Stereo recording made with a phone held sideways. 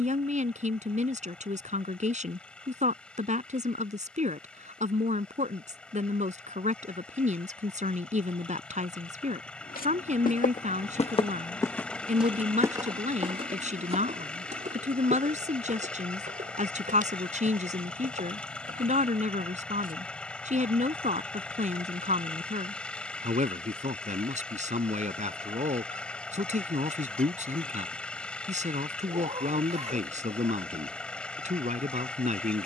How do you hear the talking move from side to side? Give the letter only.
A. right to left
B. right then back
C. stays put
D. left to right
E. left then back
C.